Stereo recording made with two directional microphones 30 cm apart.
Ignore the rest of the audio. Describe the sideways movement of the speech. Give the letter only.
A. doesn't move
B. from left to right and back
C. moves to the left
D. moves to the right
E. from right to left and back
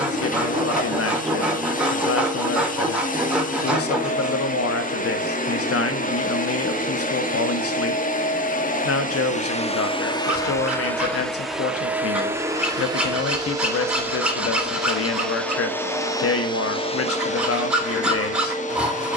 A.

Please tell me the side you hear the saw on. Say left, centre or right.
centre.